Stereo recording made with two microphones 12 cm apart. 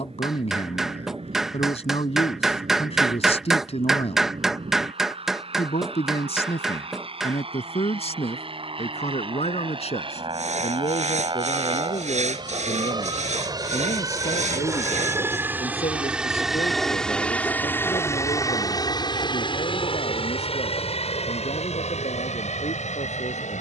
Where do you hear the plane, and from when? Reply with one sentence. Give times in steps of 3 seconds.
In this clip you hear the plane on the right from 0 s, in the centre from 15 s and on the left from 18 s.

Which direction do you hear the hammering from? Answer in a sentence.
You can hear the hammering in the centre.